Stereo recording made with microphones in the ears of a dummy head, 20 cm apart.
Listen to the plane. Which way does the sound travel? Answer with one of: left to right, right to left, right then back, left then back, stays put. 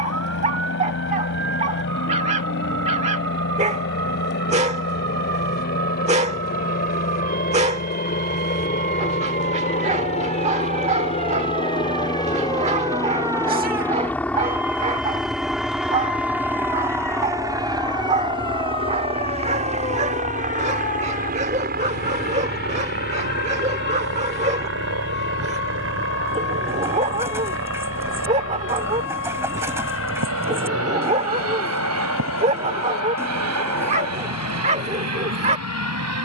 left to right.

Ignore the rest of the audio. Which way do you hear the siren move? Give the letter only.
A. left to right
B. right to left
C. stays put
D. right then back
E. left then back
B.